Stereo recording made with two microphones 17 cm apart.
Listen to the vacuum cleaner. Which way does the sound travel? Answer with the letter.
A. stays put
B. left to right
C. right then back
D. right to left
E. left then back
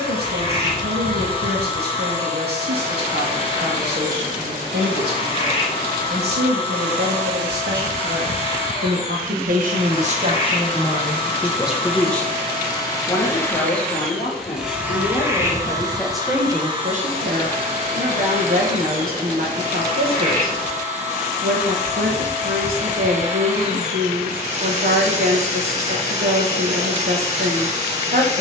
B.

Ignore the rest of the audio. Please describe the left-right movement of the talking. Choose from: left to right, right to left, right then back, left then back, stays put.
left then back.